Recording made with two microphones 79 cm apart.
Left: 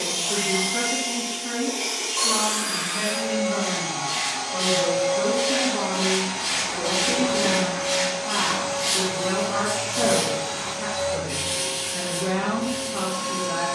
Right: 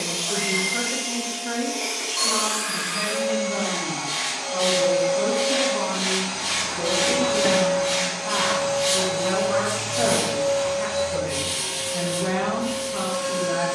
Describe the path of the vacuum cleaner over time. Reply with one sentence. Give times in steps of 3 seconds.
You can hear the vacuum cleaner on the left from 0 s, on the right from 6 s and on the left from 9 s.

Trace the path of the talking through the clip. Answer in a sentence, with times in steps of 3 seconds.
You can hear the talking in the centre from 0 s and on the right from 6 s.